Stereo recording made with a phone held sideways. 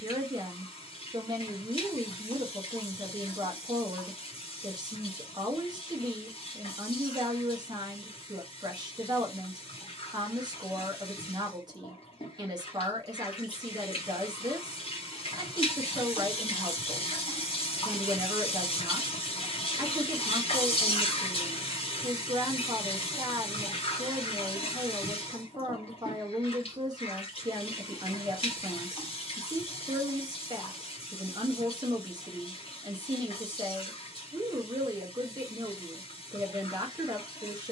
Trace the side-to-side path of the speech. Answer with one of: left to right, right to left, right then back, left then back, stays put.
stays put.